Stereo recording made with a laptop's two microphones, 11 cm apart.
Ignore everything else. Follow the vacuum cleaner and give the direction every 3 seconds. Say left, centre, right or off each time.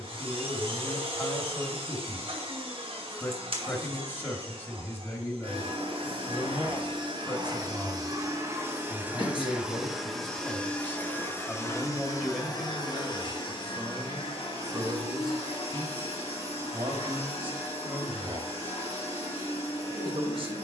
right, right, right, centre, left, left, left.